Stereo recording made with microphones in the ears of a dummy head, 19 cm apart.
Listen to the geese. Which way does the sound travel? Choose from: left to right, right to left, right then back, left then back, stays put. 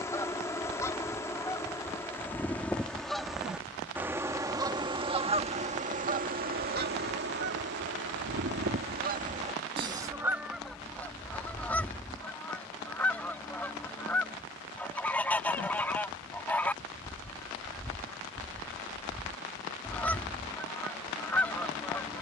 right then back.